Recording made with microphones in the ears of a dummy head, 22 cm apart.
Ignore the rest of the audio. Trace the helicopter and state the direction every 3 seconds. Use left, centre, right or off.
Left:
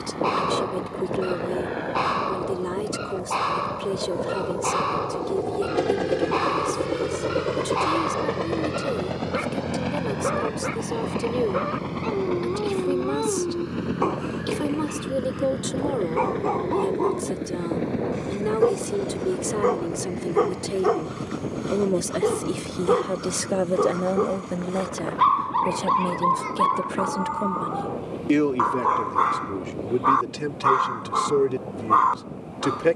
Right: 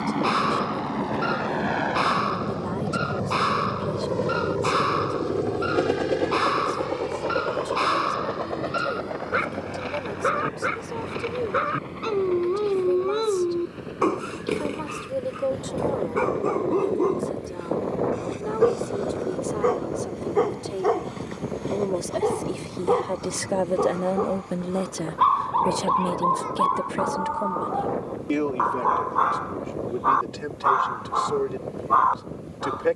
right, right, left, left, left, left, left, left, left, left, left.